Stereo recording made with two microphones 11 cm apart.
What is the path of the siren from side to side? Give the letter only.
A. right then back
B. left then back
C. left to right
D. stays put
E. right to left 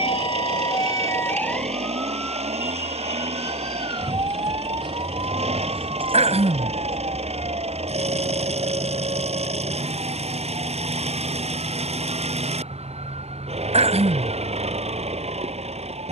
C.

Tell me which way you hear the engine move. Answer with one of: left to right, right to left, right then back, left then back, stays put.
stays put.